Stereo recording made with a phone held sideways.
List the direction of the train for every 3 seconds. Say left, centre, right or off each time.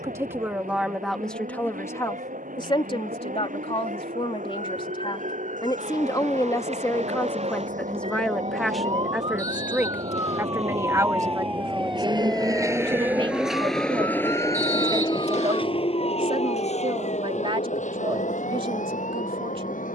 right, right, right, right, centre, left, left.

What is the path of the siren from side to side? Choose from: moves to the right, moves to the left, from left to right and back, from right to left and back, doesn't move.
moves to the left.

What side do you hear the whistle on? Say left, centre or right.
left.